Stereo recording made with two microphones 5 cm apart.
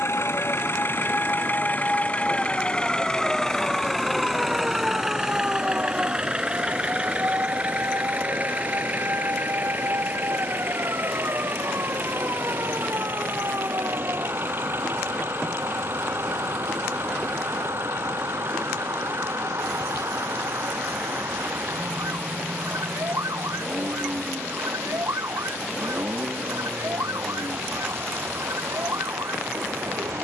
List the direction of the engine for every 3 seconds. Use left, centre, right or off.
left, centre, right, right, right, right, right, right, right, right.